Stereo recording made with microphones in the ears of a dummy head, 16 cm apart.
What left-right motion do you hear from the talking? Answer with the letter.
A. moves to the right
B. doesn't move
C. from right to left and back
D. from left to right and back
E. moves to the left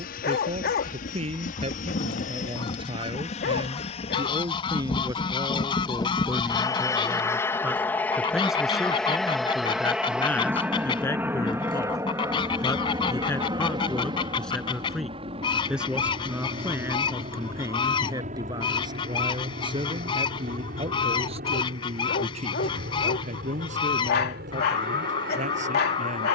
C.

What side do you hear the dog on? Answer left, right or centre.
left.